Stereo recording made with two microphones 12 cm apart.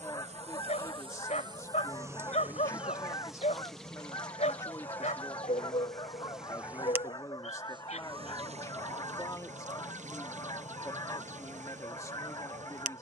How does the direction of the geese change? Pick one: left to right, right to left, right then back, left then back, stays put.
stays put.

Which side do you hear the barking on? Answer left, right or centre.
left.